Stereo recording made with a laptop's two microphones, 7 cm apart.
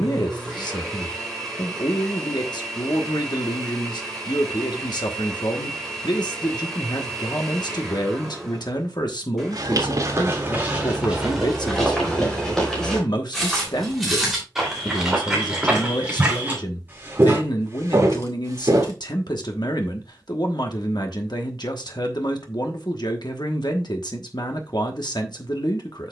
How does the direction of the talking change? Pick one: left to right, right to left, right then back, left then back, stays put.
stays put.